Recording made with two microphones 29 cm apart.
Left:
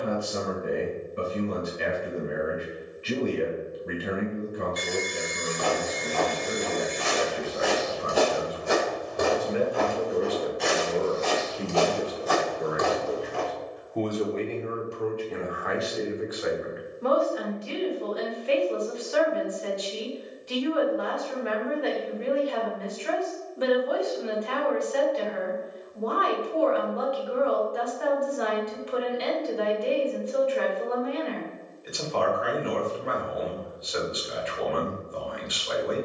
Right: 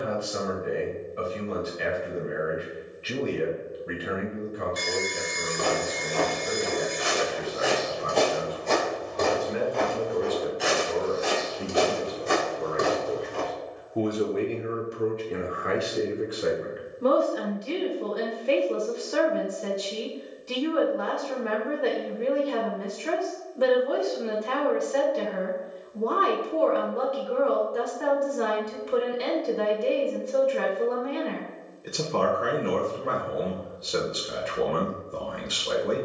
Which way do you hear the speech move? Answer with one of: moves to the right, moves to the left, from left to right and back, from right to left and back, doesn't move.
moves to the right.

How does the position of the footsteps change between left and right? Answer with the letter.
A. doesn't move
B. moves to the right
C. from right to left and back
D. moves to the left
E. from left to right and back
C.